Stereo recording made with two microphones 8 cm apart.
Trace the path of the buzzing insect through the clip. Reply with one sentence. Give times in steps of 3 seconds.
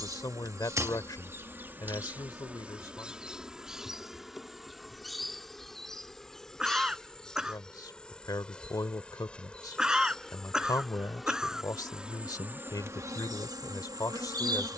In this clip you hear the buzzing insect on the right from 0 s, in the centre from 3 s and on the right from 12 s.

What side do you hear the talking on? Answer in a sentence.
In this clip you hear the talking on the left.